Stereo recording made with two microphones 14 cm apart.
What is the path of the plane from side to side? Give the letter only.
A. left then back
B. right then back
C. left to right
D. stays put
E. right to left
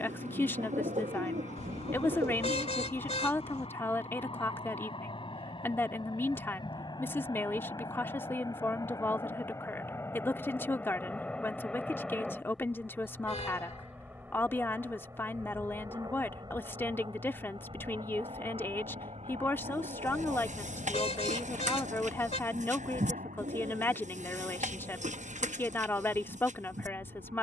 C.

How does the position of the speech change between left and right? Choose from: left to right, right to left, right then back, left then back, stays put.
stays put.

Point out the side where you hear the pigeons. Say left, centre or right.
right.